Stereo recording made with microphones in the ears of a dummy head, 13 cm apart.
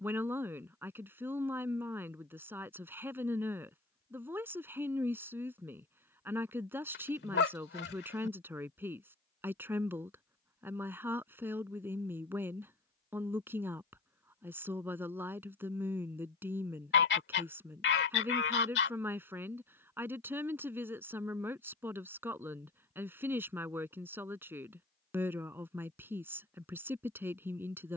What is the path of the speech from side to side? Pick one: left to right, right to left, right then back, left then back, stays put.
stays put.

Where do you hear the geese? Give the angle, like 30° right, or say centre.
80° left.